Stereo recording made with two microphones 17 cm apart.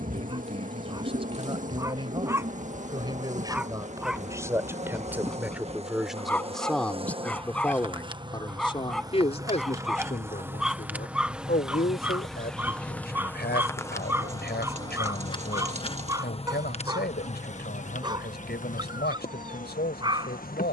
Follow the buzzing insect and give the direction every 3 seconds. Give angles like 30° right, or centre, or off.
50° right, 40° right, 30° right, 10° right, 10° left, 40° left, 50° left.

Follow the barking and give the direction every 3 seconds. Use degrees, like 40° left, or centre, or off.
20° right, centre, 10° left, centre, 10° right, 20° right, 30° right.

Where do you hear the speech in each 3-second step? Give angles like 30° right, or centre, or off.
30° right, 20° right, 10° left, 50° left, 80° left, 80° left, 80° left.